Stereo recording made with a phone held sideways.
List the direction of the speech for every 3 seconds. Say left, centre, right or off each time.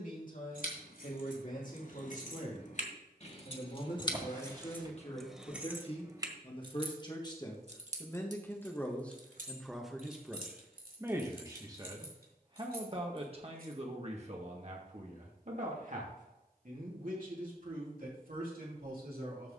left, left, left, centre, right, right, right.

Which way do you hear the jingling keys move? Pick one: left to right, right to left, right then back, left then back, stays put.
left to right.